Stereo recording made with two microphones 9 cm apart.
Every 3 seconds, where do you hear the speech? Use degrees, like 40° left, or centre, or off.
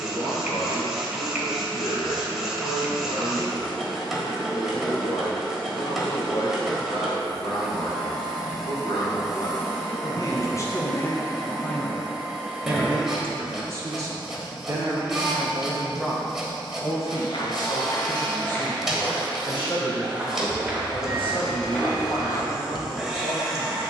70° left, 70° left, 70° left, 30° left, 20° right, 20° left, 60° left, 70° left.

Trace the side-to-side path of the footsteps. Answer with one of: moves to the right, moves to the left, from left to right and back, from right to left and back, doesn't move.
from left to right and back.